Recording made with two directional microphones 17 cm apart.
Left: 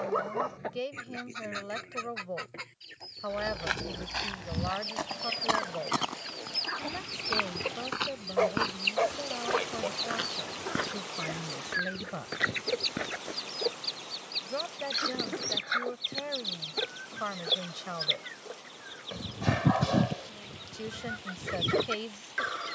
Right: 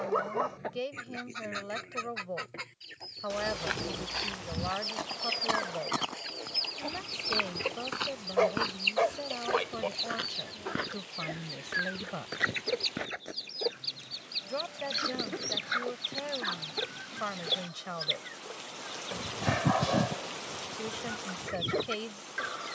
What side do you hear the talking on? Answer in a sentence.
In this clip you hear the talking in the centre.